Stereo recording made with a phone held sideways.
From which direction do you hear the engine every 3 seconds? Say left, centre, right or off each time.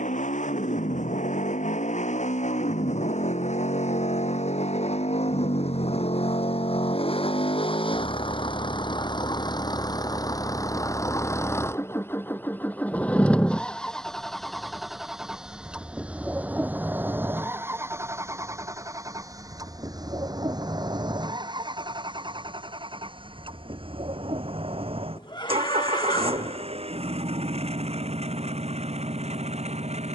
left, left, left, left, centre, centre, right, right, right, right.